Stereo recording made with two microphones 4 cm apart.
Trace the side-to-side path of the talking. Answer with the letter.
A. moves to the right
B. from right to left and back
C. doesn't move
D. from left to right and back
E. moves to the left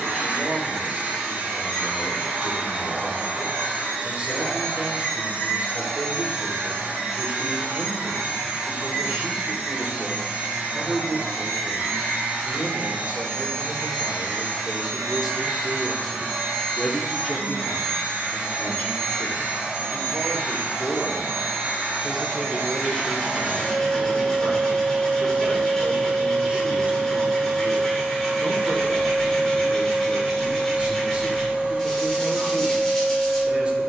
B.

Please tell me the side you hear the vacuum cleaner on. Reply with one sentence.
You can hear the vacuum cleaner on the right.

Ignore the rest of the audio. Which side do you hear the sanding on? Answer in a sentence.
You can hear the sanding in the centre.